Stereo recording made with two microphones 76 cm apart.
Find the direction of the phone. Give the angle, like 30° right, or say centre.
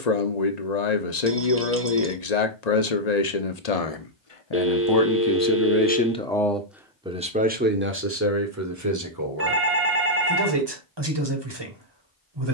20° right.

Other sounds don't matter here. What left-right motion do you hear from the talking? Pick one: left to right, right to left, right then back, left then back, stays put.
left to right.